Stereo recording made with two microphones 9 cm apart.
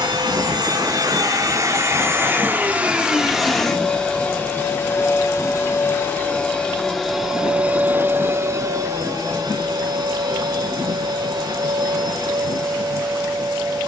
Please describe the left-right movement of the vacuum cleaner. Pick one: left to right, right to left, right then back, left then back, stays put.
left then back.